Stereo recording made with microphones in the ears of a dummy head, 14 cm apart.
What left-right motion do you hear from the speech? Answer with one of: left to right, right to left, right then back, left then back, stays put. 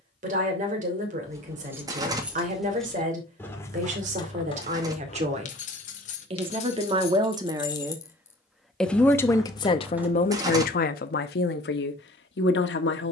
right to left.